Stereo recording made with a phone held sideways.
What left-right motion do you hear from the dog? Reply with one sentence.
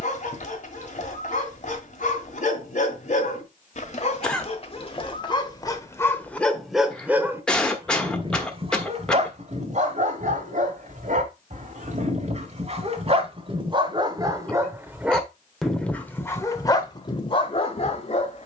In this clip you hear the dog move from left to right and back again.